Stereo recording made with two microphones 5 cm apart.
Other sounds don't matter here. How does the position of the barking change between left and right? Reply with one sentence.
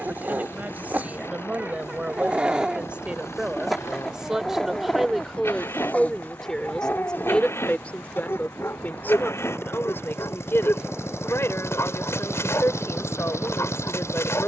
In this clip you hear the barking move to the left.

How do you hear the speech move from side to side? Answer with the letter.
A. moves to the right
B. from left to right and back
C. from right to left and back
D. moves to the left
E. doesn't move
D.